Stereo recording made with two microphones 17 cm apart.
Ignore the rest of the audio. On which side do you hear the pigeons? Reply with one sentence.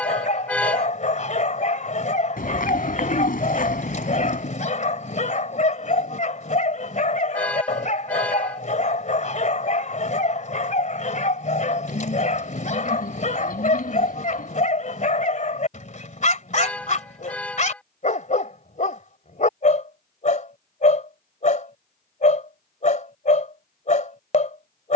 You can hear the pigeons on the left.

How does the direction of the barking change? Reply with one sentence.
You can hear the barking stay in one place.